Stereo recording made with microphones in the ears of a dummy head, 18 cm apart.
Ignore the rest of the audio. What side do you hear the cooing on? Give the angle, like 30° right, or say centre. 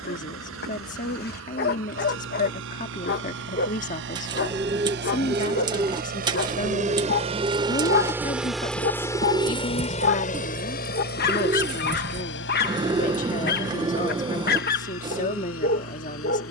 20° right.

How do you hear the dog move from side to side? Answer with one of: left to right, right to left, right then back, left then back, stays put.
stays put.